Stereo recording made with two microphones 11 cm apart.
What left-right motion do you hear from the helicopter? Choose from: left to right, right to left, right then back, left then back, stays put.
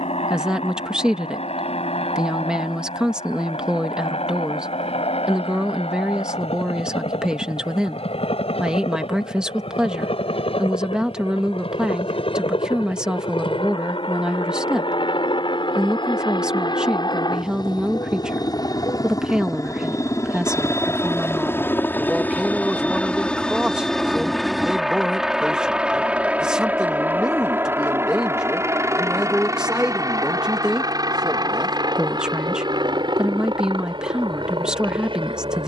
left to right.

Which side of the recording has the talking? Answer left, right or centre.
centre.